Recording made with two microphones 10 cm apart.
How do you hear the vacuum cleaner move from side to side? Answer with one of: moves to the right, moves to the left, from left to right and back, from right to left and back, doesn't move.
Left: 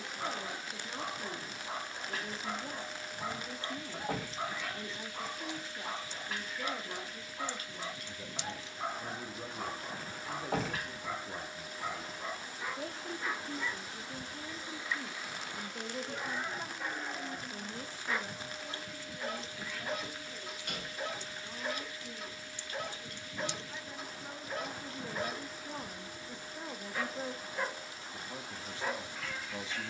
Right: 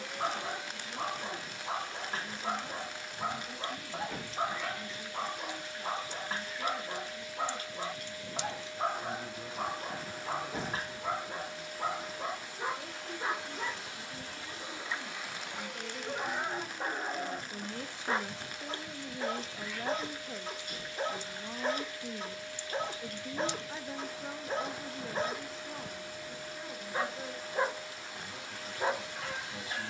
doesn't move.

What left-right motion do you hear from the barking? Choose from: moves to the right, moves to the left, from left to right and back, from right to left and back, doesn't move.
doesn't move.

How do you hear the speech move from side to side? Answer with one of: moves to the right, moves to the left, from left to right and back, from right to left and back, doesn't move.
from left to right and back.